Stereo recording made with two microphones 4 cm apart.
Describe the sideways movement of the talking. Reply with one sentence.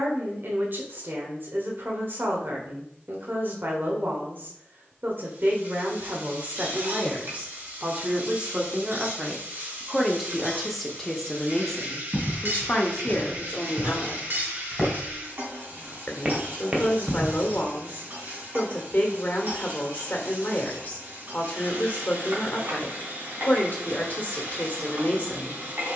In this clip you hear the talking go from the right side to the left.